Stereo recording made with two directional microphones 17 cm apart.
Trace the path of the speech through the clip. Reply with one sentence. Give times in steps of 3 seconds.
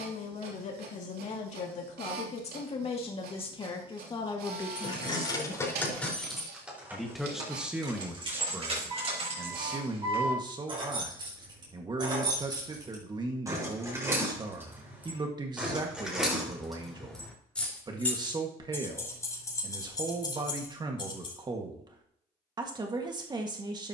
You can hear the speech on the left from 0 s, in the centre from 6 s and on the right from 9 s.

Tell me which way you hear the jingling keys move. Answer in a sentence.
In this clip you hear the jingling keys go right and come back.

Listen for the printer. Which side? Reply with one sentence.
You can hear the printer on the right.